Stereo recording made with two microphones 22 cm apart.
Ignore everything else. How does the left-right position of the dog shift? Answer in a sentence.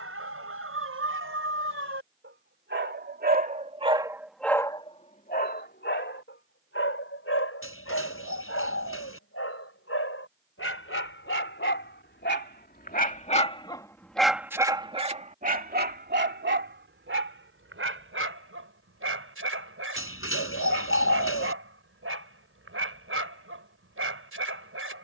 You can hear the dog go left and come back.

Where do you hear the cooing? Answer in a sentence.
In this clip you hear the cooing on the left.